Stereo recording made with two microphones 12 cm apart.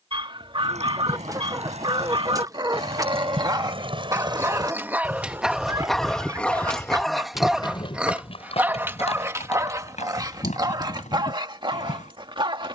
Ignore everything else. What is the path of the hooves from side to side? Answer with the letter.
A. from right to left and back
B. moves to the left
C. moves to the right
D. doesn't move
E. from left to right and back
B.